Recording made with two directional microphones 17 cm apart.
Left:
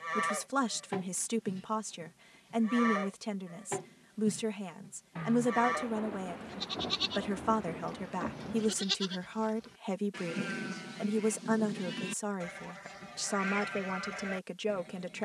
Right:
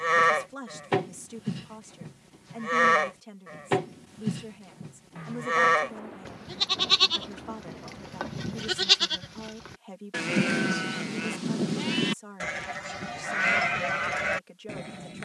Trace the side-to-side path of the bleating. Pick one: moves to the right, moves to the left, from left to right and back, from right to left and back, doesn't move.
doesn't move.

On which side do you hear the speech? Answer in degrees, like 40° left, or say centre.
50° left.